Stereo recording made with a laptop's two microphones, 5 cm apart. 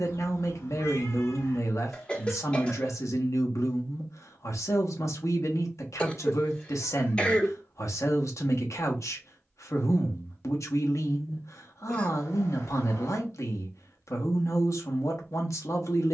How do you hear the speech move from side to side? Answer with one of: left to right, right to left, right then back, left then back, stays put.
stays put.